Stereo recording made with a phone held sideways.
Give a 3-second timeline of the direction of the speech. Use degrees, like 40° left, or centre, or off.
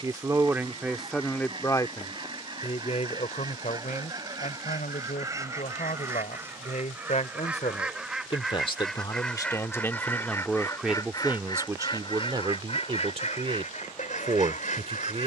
10° left, 60° left, 50° left, centre, 40° right.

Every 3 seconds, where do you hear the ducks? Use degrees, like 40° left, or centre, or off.
30° right, 30° right, 10° right, 20° left, 50° left.